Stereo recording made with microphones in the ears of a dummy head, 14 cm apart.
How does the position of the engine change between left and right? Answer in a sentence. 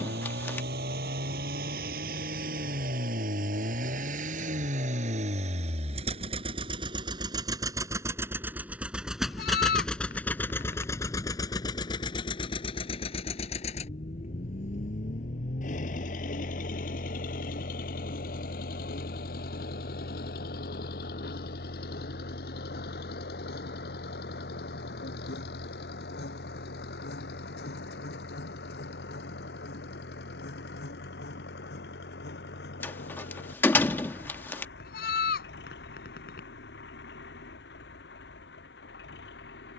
You can hear the engine go from the right side to the left.